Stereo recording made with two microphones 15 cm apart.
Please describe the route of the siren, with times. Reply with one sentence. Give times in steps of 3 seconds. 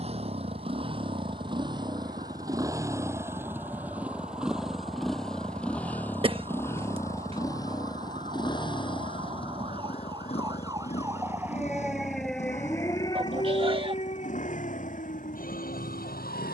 In this clip you hear the siren on the right from 0 s and on the left from 12 s.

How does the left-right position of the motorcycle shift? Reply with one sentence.
In this clip you hear the motorcycle go from the right side to the left.